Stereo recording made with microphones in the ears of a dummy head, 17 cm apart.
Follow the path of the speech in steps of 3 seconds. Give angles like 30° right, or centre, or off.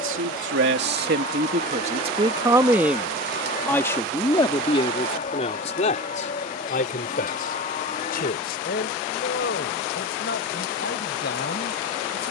40° right, 20° left, 40° left, 50° left.